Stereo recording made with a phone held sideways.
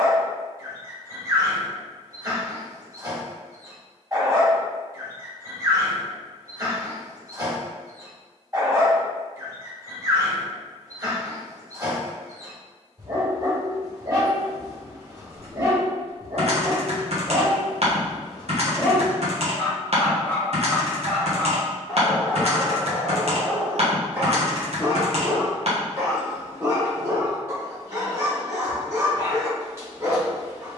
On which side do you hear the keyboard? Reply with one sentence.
You can hear the keyboard on the right.